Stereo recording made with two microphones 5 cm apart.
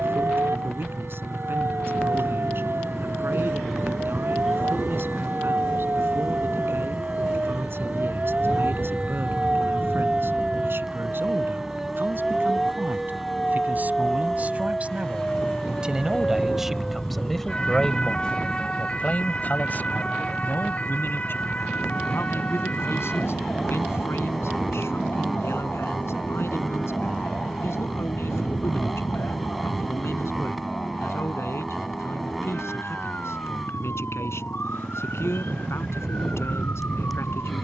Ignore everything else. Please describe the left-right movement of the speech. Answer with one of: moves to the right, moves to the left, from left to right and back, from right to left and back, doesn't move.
moves to the left.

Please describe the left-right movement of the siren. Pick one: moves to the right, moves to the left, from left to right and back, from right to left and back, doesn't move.
moves to the left.